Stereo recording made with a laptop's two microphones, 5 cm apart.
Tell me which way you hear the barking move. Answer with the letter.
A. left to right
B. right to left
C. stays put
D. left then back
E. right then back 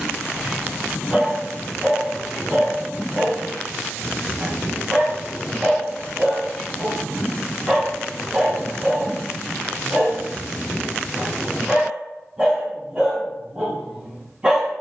C.